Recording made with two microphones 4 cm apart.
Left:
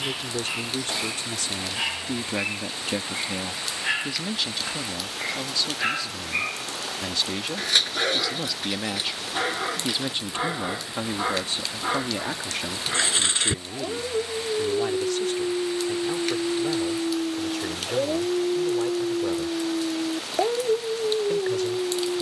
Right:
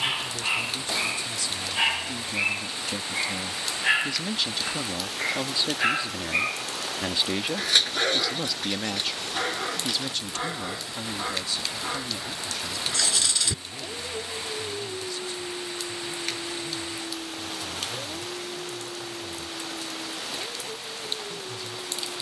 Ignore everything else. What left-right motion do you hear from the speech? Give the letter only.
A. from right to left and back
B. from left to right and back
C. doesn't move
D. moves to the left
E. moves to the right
B.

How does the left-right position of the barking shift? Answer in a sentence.
In this clip you hear the barking move from right to left.